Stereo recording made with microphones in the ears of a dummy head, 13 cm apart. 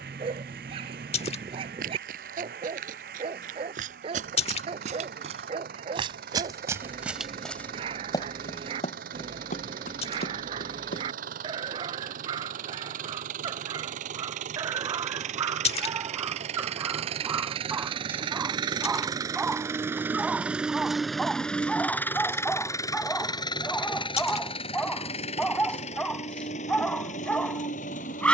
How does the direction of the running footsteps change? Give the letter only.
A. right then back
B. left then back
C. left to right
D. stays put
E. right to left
E.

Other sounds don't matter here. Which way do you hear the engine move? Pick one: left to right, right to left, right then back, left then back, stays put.
right to left.